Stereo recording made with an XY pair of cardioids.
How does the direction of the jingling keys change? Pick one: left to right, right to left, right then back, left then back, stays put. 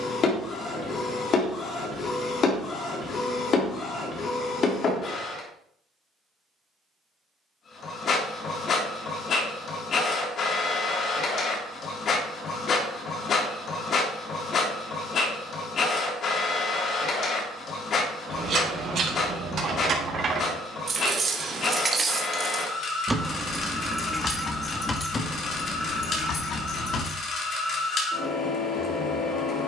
right to left.